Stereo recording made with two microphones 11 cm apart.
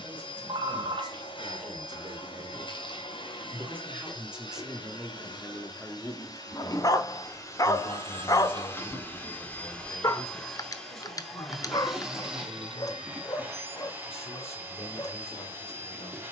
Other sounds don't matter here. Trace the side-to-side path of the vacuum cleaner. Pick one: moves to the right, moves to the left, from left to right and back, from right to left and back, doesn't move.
moves to the right.